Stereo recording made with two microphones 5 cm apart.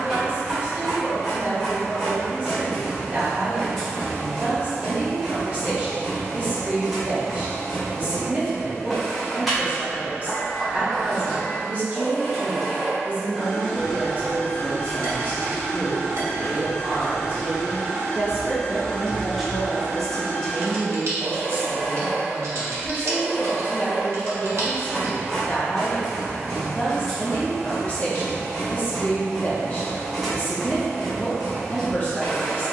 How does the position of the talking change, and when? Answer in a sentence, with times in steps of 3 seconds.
You can hear the talking on the right from 0 s, in the centre from 18 s and on the left from 21 s.